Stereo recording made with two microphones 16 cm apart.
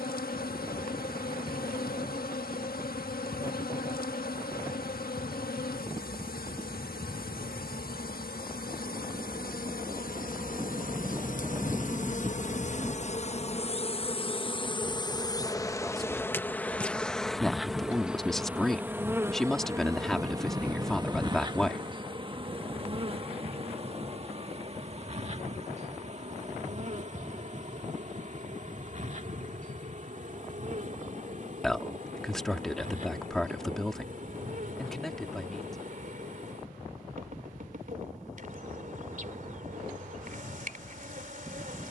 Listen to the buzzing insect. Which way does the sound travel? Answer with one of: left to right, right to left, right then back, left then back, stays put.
left to right.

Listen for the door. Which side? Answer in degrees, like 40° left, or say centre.
10° right.